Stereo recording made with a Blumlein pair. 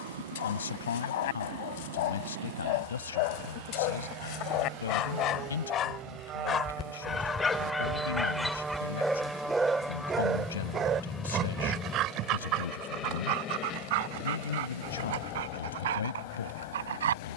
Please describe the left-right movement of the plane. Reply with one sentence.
In this clip you hear the plane move from right to left.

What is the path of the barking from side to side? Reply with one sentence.
In this clip you hear the barking travel towards the right.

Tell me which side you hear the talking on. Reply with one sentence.
You can hear the talking on the left.